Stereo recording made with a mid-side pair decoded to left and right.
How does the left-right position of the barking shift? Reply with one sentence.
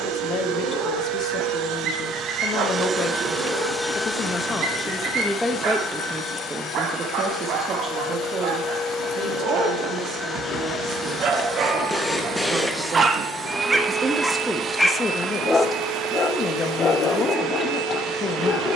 In this clip you hear the barking go from the right side to the left.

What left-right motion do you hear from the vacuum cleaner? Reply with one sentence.
In this clip you hear the vacuum cleaner go left and come back.